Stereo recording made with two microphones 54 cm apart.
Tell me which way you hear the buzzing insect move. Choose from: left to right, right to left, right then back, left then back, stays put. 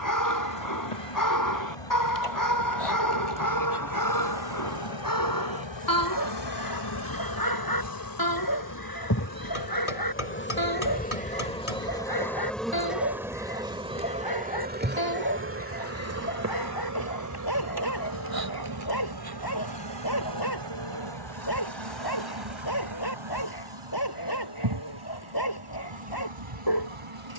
left to right.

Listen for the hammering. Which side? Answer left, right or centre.
left.